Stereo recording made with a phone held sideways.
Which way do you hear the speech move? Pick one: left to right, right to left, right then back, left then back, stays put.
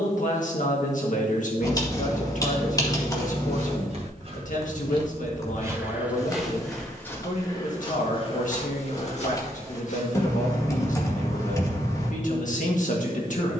stays put.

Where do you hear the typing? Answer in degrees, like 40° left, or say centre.
20° left.